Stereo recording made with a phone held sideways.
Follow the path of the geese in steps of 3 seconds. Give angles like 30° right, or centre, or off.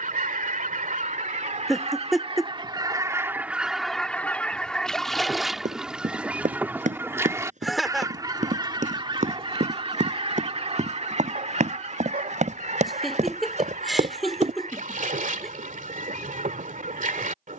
50° right, centre, 20° right, 40° right, 60° right, 60° right.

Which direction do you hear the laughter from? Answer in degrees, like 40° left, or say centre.
centre.